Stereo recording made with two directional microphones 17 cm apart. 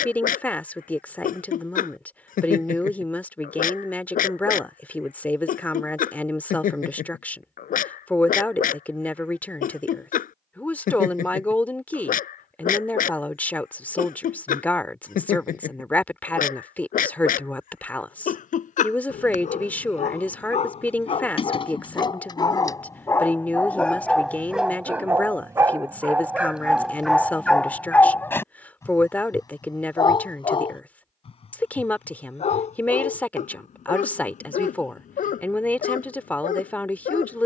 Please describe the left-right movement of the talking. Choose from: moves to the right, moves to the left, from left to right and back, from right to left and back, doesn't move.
doesn't move.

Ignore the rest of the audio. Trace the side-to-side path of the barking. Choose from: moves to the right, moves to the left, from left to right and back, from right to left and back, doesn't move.
from left to right and back.